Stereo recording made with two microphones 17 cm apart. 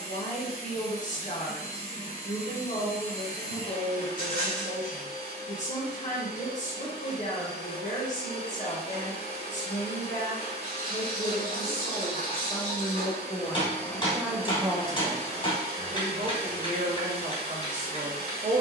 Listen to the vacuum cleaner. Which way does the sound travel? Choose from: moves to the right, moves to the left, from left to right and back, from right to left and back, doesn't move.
doesn't move.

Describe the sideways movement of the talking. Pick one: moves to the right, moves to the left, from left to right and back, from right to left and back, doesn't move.
moves to the right.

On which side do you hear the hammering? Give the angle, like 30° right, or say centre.
30° left.